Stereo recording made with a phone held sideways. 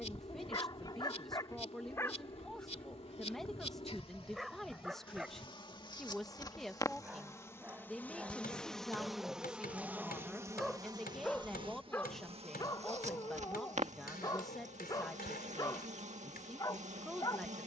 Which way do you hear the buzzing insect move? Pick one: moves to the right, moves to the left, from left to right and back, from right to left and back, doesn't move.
moves to the right.